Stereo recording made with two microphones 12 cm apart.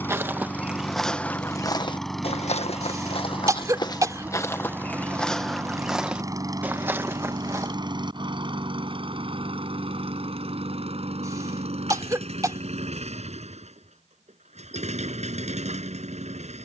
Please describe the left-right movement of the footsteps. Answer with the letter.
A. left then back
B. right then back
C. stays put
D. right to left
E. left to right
A.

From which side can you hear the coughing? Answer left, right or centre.
right.